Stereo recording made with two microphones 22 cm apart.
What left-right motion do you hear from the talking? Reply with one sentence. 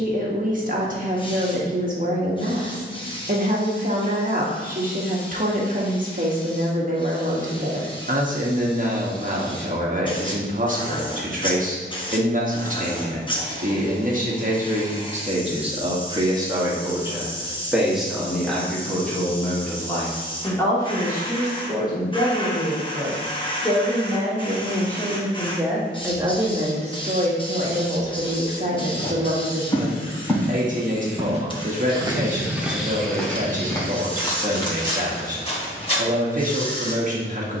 You can hear the talking go left and come back.